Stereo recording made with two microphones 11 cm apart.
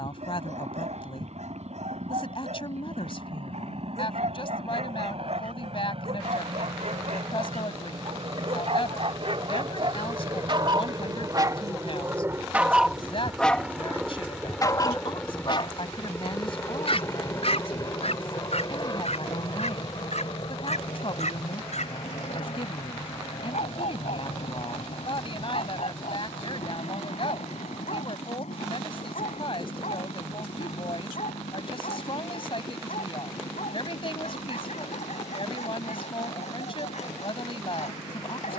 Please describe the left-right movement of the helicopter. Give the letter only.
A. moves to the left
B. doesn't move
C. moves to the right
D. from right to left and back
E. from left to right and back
A.